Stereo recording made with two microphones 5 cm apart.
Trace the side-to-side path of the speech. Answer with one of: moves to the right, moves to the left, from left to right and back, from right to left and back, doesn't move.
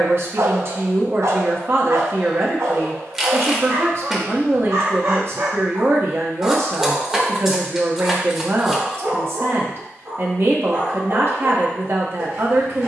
doesn't move.